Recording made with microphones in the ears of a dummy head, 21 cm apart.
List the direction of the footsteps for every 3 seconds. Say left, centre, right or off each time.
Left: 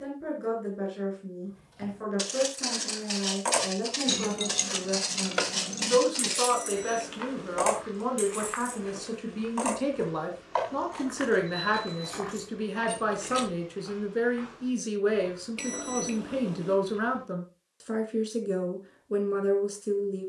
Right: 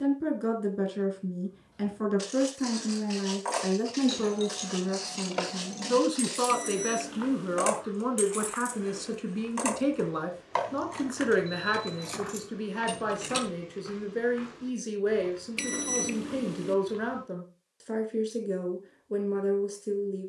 left, left, left, centre, right, right, off.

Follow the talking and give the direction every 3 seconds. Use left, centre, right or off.
right, right, right, centre, centre, centre, centre.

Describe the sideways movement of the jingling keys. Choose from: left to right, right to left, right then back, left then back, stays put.
left to right.